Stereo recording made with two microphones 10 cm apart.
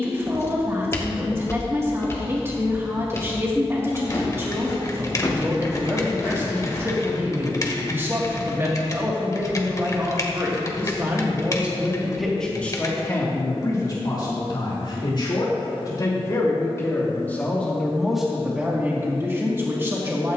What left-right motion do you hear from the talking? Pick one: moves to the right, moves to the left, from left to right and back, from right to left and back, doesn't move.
from right to left and back.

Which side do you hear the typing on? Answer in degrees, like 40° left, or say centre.
30° left.